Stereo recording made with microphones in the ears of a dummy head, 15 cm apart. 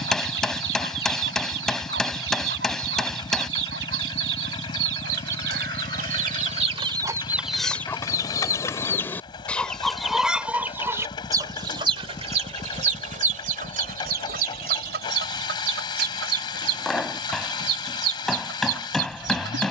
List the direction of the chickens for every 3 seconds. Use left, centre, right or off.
right, right, centre, centre, right, right, right.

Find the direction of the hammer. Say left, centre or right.
centre.